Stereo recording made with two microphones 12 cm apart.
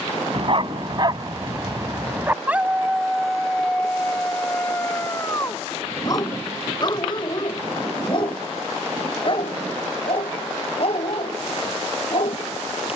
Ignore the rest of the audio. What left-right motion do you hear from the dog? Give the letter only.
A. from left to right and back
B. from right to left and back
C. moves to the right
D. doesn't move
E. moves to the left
E.